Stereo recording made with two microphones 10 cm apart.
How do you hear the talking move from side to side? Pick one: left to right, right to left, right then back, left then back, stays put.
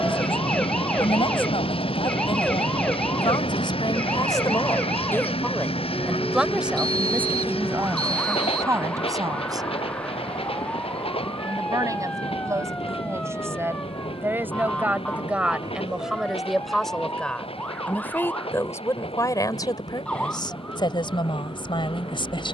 right then back.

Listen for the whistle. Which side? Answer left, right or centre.
right.